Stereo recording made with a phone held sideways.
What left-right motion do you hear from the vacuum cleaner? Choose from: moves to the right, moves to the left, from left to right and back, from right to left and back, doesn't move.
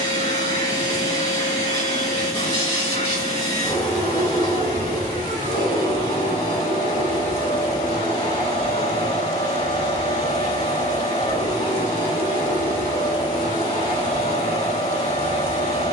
doesn't move.